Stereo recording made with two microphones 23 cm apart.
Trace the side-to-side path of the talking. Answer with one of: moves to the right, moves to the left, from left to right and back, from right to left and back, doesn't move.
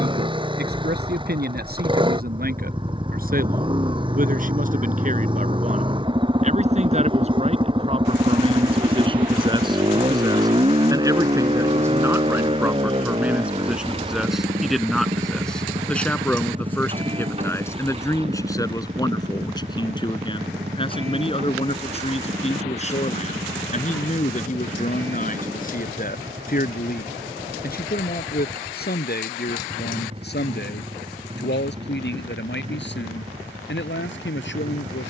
moves to the left.